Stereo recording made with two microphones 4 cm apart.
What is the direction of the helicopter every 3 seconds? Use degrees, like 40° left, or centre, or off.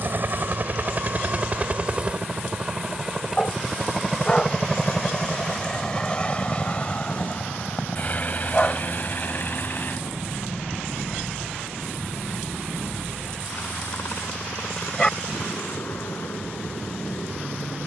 30° right, 10° left, 30° left, 50° left, 50° left, 60° left.